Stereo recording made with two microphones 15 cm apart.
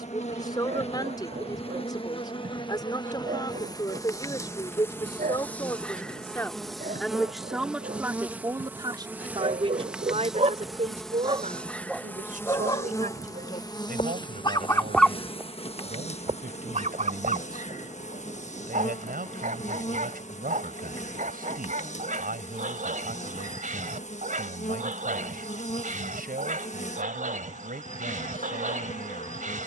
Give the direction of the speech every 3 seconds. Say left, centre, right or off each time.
left, left, centre, right, right, right, right, right, right, right.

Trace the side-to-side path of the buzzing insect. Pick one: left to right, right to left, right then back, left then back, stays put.
right then back.